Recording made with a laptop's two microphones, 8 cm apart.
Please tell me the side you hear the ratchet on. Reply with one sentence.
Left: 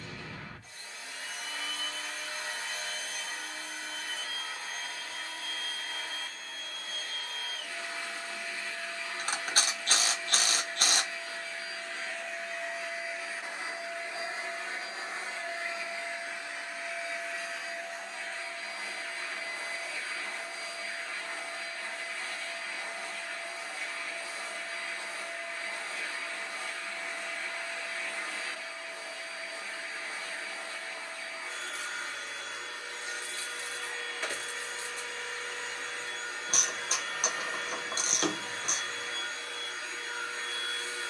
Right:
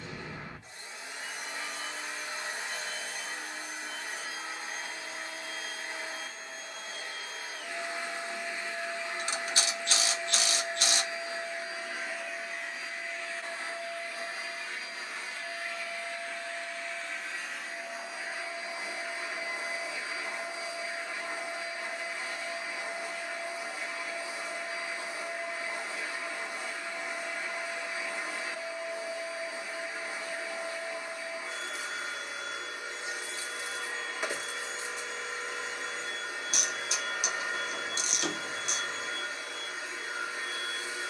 In this clip you hear the ratchet on the left.